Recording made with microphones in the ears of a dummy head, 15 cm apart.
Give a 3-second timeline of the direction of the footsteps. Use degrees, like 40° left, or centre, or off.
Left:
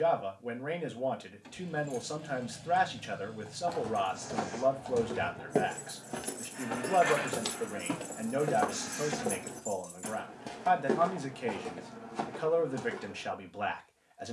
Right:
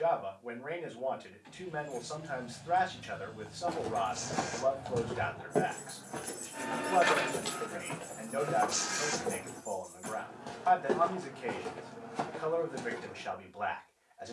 off, centre, 40° left, 20° left, 10° right.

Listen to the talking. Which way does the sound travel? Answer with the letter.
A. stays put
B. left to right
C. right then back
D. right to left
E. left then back
A.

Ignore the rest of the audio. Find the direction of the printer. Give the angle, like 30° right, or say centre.
50° right.